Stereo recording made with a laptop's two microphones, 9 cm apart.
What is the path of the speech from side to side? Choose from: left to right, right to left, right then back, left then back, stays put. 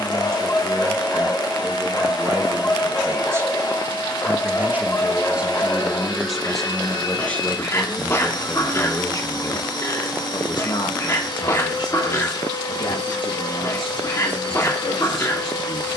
right to left.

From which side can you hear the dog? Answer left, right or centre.
left.